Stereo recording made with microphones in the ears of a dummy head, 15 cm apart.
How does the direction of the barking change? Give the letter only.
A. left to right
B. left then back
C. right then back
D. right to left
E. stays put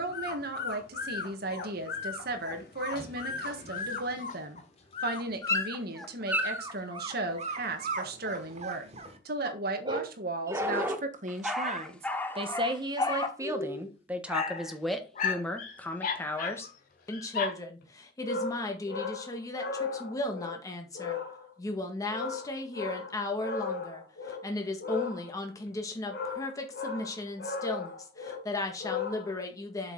C.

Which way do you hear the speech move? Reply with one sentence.
You can hear the speech move to the left.